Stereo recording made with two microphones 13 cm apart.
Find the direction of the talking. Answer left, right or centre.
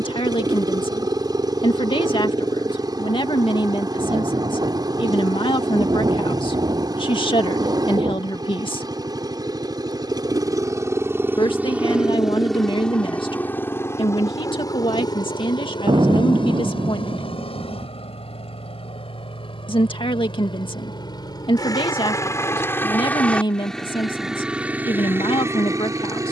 left.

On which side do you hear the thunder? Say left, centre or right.
right.